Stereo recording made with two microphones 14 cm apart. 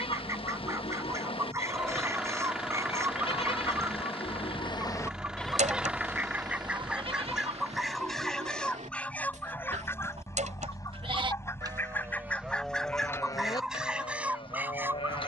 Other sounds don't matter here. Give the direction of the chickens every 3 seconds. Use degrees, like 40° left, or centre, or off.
20° right, 20° right, centre, 20° left, centre.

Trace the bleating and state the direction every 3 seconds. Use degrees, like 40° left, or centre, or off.
40° left, 30° left, 40° right, 40° right, 20° left.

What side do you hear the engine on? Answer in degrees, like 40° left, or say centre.
10° right.